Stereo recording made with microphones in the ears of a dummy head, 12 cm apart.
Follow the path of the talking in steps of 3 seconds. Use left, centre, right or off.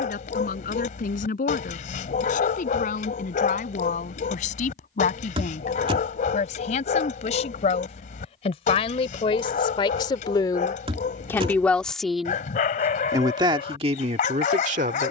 left, left, left, left, right.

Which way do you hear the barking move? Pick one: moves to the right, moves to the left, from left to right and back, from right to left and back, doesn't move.
doesn't move.